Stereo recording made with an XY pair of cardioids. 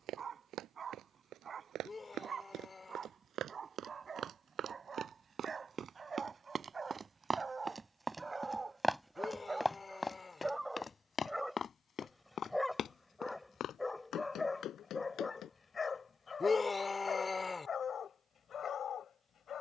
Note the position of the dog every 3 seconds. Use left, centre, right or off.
right, right, right, centre, centre, left, left.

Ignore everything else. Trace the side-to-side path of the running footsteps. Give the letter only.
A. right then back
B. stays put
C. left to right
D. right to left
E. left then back
D.